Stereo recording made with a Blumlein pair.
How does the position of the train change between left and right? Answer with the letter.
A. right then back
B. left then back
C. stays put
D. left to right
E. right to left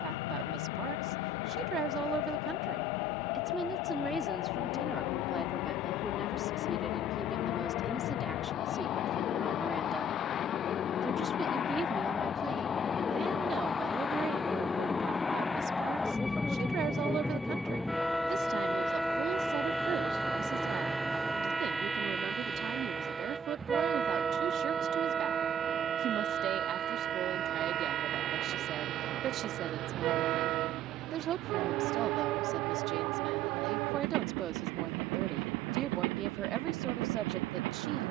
D.